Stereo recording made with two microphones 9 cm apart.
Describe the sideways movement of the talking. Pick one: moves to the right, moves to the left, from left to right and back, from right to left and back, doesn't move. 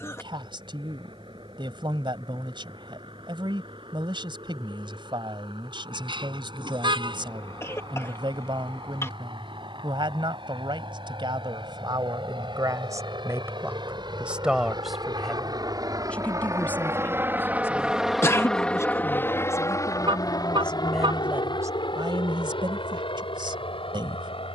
from right to left and back.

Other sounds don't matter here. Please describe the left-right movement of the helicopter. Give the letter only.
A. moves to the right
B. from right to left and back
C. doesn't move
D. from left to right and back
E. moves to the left
E.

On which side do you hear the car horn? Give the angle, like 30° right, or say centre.
60° right.